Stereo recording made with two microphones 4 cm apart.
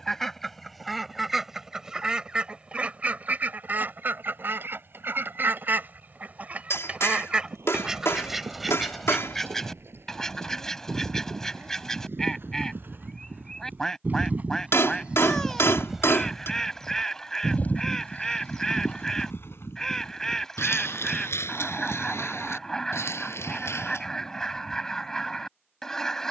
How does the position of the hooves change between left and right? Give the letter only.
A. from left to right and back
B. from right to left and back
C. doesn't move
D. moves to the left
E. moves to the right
D.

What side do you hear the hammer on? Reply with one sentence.
In this clip you hear the hammer on the left.